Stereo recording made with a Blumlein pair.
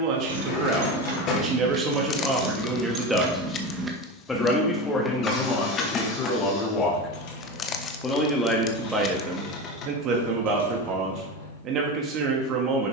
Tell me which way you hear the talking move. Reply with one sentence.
In this clip you hear the talking move from right to left and back again.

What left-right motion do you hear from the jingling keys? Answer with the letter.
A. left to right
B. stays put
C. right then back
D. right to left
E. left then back
D.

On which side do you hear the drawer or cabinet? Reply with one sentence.
You can hear the drawer or cabinet on the left.